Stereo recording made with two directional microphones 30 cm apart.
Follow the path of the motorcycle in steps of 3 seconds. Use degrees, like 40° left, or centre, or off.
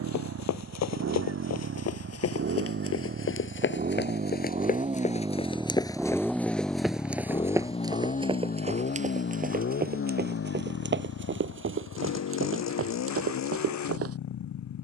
50° right, 20° right, 20° left, 50° left, 60° left.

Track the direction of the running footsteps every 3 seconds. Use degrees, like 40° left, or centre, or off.
60° left, 30° left, 10° right, 30° right, 50° right.